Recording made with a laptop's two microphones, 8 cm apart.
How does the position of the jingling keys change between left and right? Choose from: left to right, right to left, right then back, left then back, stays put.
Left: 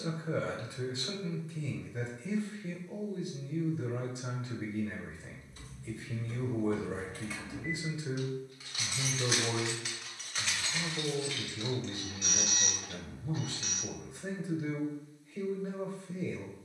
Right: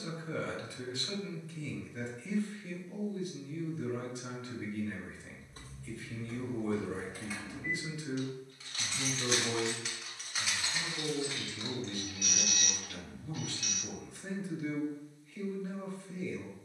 left then back.